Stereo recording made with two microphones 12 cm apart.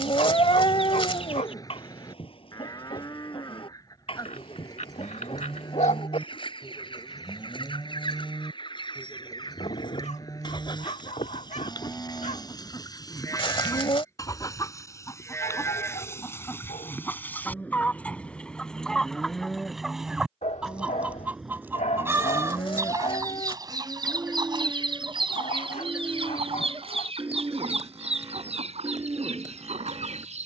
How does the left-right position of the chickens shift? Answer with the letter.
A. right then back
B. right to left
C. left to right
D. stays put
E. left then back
C.